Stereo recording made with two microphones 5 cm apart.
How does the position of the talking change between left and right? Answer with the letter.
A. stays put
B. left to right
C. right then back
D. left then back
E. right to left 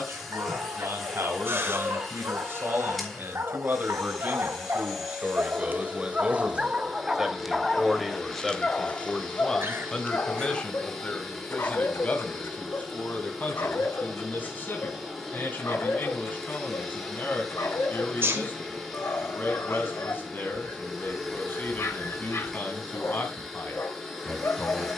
E.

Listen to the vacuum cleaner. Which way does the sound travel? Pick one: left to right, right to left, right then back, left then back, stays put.
stays put.